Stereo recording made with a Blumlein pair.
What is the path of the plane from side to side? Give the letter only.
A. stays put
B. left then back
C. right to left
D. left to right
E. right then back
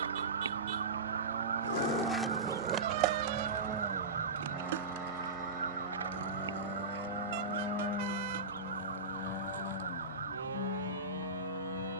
C.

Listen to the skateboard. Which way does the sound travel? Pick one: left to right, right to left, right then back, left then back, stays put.
left to right.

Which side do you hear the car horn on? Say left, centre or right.
right.